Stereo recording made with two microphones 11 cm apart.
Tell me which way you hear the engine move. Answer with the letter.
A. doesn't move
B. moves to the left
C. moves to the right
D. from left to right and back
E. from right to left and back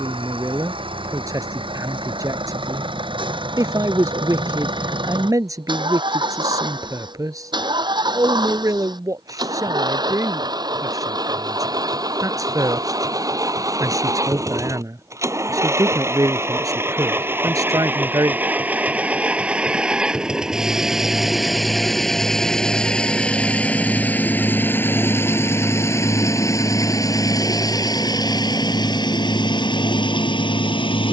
B.